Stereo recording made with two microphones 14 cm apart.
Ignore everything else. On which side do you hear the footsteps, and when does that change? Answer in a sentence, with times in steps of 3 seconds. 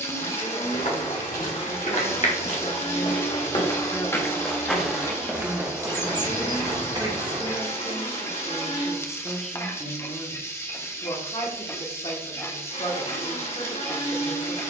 You can hear the footsteps on the left from 0 s, in the centre from 3 s, on the right from 6 s and not at all from 9 s.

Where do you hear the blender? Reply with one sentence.
In this clip you hear the blender on the left.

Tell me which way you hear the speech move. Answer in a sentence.
You can hear the speech move from left to right and back again.